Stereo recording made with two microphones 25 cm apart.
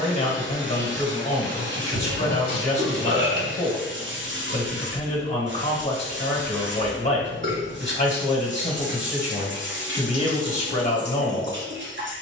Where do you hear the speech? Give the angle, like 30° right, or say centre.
30° left.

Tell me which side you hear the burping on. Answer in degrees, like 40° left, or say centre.
50° right.